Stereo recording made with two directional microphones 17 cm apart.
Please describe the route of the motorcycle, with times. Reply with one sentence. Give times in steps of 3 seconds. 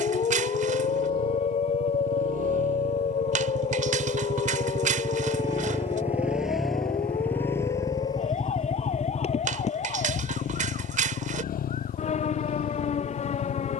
In this clip you hear the motorcycle on the right from 0 s, in the centre from 6 s and on the left from 9 s.